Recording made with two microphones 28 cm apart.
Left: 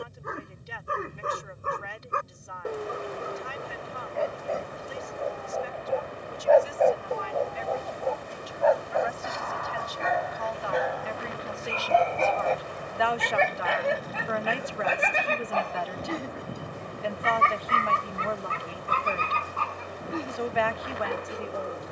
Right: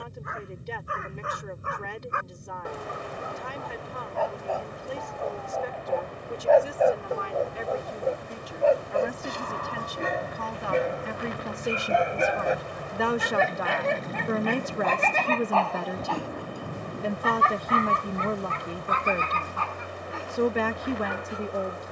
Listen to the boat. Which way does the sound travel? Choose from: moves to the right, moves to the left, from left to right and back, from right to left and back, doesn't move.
doesn't move.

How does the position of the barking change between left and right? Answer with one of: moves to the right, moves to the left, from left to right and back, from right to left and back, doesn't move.
from left to right and back.